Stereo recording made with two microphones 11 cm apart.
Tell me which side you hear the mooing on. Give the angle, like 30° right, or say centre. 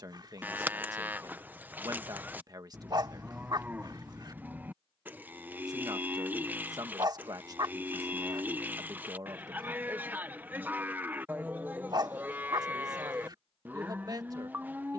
20° right.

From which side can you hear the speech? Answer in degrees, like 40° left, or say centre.
40° right.